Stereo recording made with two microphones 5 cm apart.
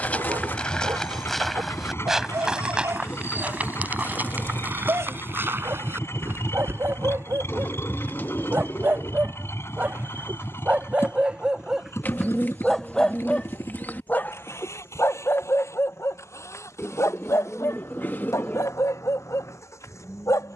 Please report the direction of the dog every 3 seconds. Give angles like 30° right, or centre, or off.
60° right, 60° right, 50° right, 30° right, 20° left, 60° left, 80° left.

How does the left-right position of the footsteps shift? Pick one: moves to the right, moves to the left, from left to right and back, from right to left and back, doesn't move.
moves to the right.